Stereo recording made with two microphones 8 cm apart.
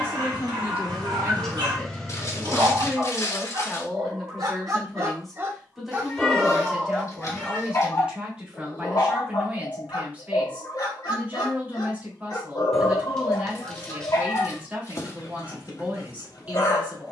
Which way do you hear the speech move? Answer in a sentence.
In this clip you hear the speech move to the right.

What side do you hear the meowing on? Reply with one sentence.
You can hear the meowing in the centre.